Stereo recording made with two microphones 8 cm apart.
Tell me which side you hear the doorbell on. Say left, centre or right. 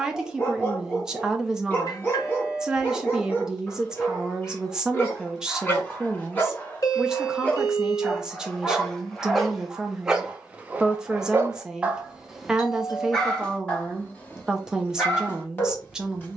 left.